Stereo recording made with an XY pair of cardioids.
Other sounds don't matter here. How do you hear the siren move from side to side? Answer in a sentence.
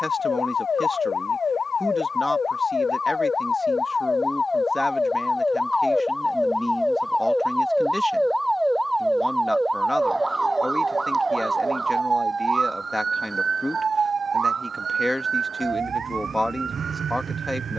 In this clip you hear the siren travel towards the right.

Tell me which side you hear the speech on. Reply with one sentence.
In this clip you hear the speech in the centre.